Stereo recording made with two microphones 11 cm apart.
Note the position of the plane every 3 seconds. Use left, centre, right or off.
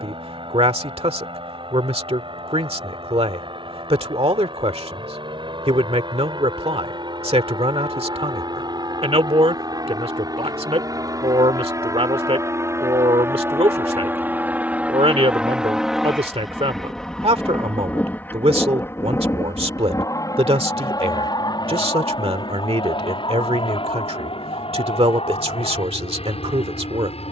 right, right, right, right, right, centre, left, left, left.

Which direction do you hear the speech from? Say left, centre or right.
right.